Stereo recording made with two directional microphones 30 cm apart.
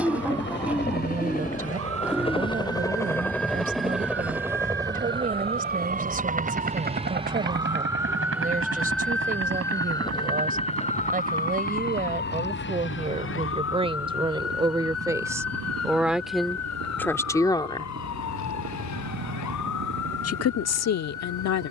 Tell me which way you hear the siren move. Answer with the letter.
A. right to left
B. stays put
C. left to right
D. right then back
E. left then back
A.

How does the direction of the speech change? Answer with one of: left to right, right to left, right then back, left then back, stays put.
right to left.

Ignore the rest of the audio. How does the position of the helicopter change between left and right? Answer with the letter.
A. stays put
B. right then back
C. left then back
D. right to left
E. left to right
E.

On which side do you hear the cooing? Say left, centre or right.
centre.